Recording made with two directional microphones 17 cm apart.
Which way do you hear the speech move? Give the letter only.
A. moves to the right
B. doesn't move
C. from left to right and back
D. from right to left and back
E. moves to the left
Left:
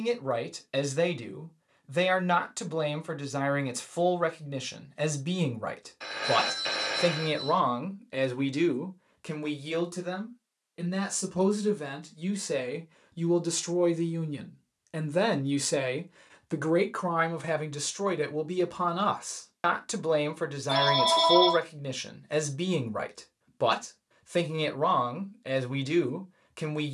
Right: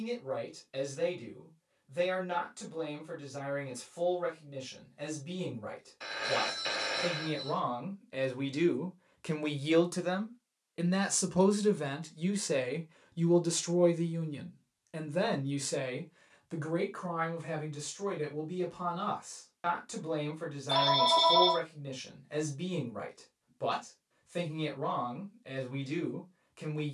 C.